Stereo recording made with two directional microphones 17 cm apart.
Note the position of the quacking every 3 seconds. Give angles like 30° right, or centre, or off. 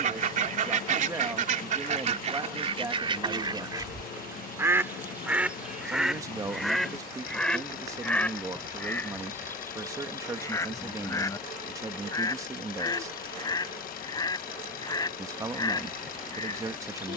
50° right, 20° right, centre, 20° left, 20° left, 20° left.